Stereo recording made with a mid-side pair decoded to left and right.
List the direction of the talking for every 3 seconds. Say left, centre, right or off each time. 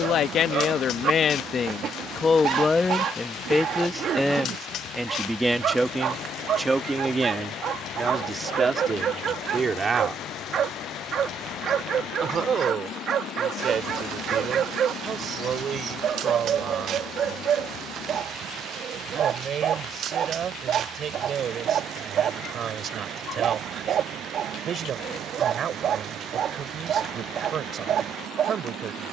left, centre, right, right, right, right, right, right, right, right.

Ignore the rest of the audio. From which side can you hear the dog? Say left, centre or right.
right.